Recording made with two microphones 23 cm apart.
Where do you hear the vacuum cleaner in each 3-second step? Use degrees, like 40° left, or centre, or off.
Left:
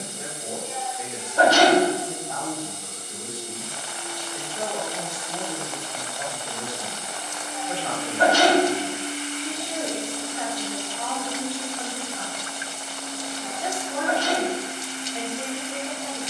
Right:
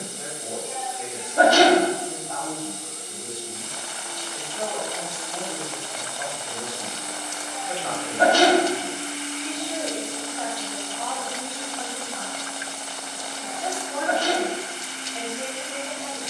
50° right, 40° right, 10° right, 30° left, centre, 40° right.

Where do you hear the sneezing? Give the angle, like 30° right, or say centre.
50° right.